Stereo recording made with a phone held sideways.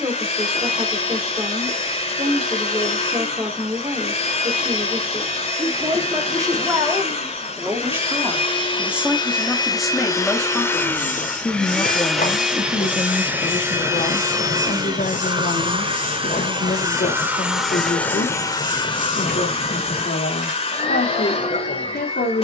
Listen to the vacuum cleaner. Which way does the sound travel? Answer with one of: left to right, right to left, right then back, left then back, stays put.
right then back.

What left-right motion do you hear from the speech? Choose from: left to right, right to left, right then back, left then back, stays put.
right to left.